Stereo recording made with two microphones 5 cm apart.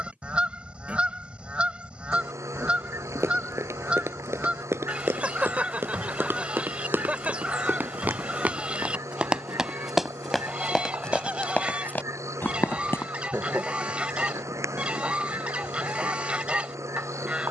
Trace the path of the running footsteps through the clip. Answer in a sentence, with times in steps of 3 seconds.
You can hear the running footsteps not at all from 0 s, on the right from 3 s, in the centre from 9 s, on the left from 12 s and not at all from 15 s.